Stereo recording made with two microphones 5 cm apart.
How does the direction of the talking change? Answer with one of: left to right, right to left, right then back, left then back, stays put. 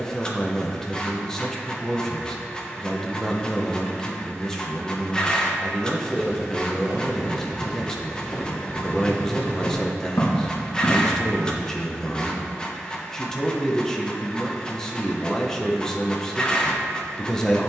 stays put.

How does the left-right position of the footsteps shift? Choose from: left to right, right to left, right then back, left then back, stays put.
right to left.